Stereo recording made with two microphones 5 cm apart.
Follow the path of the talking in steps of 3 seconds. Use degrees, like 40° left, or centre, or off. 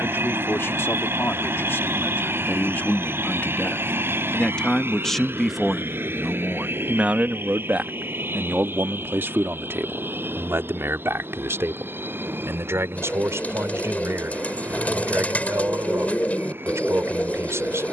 60° left, 20° left, 30° right, 60° right, 70° right, 70° right.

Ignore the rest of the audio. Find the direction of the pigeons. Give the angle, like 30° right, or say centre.
30° left.